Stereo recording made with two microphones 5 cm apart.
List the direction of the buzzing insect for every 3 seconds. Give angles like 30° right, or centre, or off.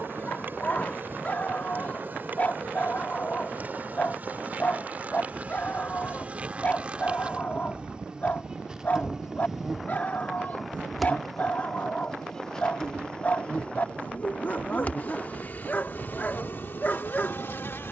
40° right, 40° right, 20° right, centre, 30° left, 50° left.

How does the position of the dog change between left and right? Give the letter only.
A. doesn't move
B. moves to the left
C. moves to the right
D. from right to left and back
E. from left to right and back
A.